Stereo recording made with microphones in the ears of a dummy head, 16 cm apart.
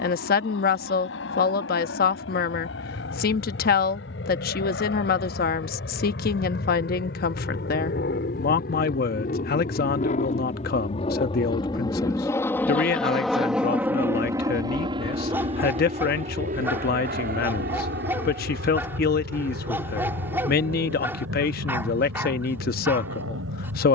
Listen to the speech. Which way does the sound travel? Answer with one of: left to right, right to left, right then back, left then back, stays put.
stays put.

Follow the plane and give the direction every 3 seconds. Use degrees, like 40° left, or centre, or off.
70° left, 70° left, 60° left, 40° left, centre, 40° right, 60° right, 70° right.